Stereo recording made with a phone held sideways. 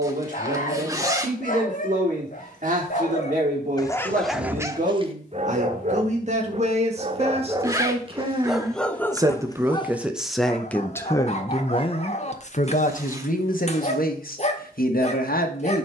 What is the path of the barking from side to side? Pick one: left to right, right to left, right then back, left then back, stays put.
right then back.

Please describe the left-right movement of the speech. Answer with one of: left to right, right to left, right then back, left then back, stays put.
right to left.